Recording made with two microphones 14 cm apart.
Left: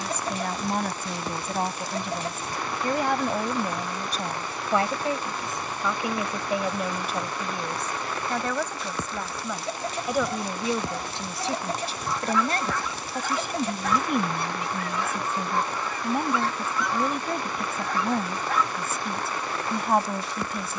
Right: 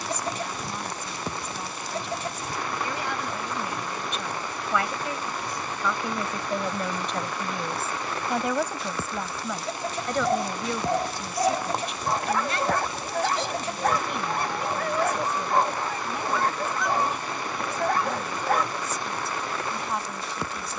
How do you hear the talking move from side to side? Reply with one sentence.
In this clip you hear the talking go right and come back.